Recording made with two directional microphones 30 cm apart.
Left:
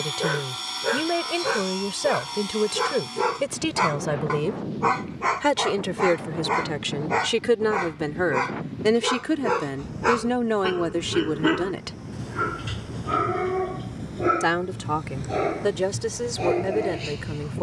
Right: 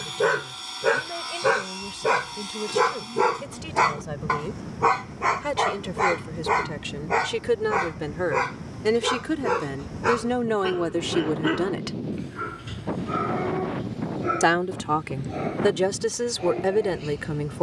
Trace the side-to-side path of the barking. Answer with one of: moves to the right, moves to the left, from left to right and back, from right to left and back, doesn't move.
moves to the left.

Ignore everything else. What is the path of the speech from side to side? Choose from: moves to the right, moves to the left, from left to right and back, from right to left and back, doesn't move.
moves to the right.